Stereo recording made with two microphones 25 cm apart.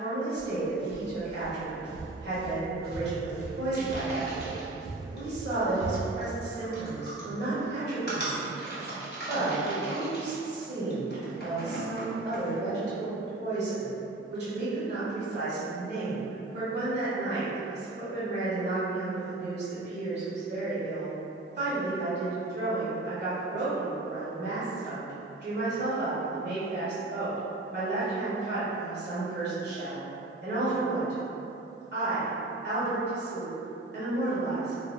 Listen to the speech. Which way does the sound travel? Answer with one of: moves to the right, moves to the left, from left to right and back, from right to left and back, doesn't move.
doesn't move.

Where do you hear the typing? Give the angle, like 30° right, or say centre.
40° left.